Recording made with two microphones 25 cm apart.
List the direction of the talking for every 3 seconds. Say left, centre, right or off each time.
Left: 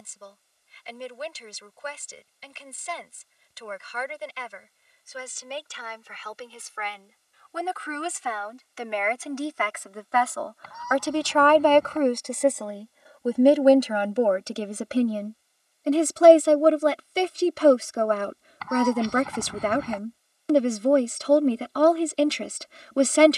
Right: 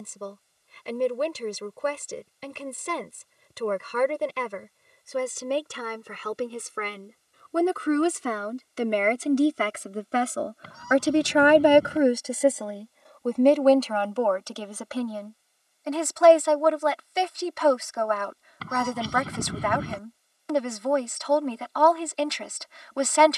right, right, right, right, centre, left, left, left.